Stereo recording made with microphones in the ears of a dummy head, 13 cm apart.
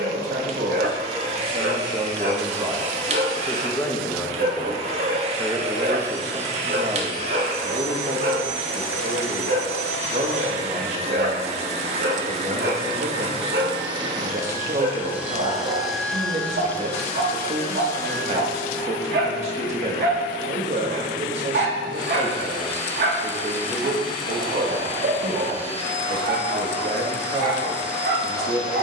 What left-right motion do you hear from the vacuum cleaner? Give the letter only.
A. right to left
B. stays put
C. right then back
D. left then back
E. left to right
A.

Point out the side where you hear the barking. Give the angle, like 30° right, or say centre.
70° right.